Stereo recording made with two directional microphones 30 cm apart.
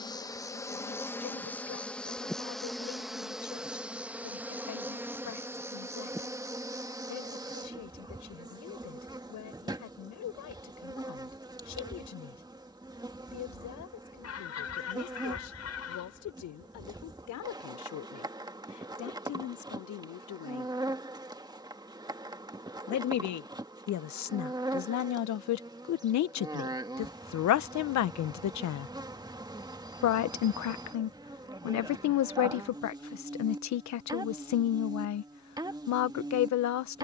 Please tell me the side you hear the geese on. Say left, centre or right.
left.